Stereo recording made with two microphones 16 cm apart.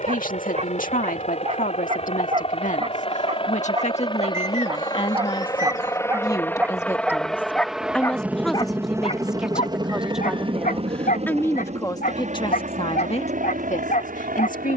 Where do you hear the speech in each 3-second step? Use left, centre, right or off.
left, left, centre, centre, left.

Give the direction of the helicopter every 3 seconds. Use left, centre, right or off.
left, left, centre, right, right.